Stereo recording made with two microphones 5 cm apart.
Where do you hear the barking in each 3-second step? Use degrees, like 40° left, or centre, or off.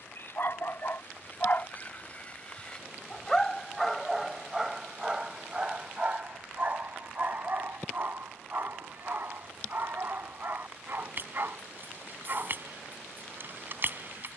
40° left, 10° right, 40° right, 50° right, 50° right.